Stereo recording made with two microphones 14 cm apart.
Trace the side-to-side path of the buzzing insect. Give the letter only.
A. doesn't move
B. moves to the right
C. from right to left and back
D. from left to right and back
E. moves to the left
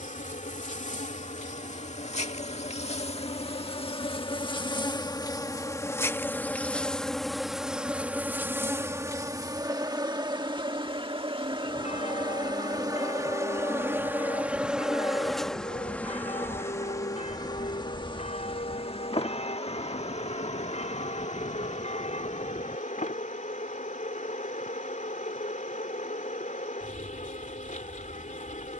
D.